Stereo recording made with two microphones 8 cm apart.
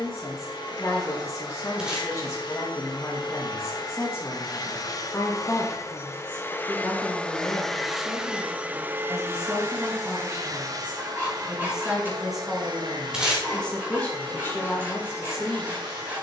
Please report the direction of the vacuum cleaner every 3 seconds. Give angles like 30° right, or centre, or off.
70° left, 50° left, 10° left, 40° right, 60° right, 70° right.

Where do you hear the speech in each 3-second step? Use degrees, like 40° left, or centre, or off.
40° left, 30° left, centre, 10° right, 10° left, 30° left.